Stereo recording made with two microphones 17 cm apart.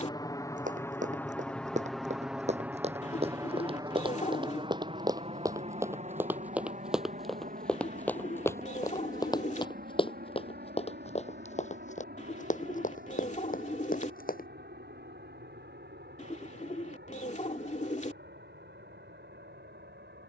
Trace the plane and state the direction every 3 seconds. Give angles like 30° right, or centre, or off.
10° left, 30° right, 50° right, 60° right, 70° right, 70° right, 70° right.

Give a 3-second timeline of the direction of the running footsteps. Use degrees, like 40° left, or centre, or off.
50° right, 30° right, centre, 40° left, 60° left, off, off.